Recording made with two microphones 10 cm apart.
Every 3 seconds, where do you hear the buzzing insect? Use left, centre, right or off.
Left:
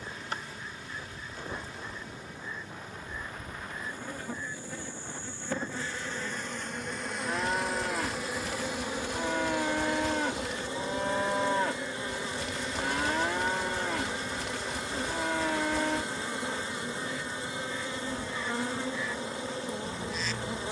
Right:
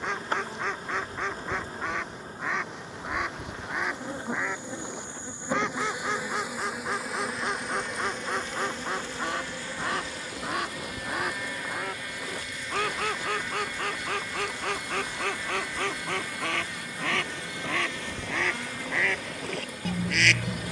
right, right, centre, left, left, left, left.